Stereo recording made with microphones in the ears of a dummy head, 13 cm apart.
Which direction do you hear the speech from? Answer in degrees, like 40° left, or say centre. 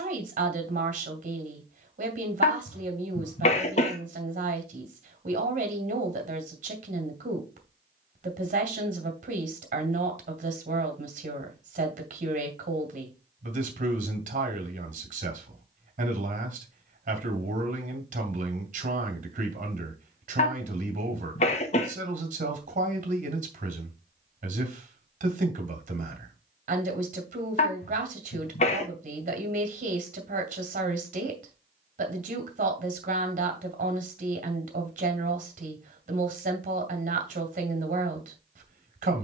50° right.